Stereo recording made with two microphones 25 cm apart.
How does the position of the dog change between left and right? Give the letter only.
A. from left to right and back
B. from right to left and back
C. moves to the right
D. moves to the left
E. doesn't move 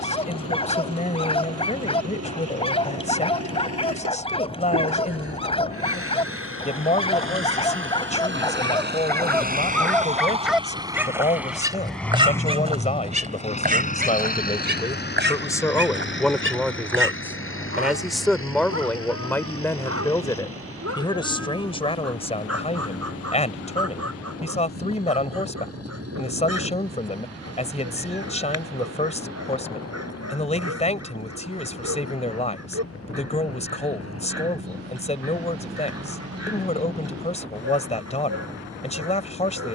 C.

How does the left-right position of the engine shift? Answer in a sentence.
You can hear the engine move from right to left.